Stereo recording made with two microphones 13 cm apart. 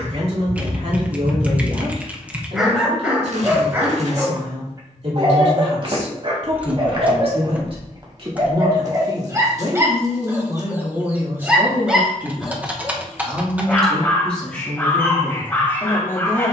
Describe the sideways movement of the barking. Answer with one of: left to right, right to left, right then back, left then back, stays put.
right then back.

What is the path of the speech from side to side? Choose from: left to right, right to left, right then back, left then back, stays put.
right to left.